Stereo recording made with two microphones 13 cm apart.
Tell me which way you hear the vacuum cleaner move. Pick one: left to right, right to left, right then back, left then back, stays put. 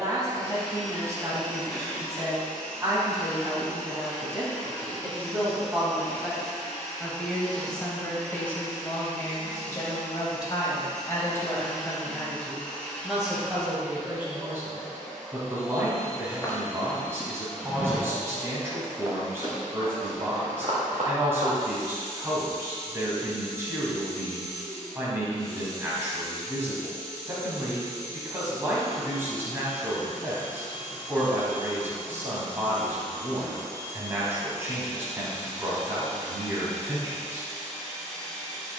stays put.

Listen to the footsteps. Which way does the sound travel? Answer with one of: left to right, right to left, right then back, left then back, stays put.
left to right.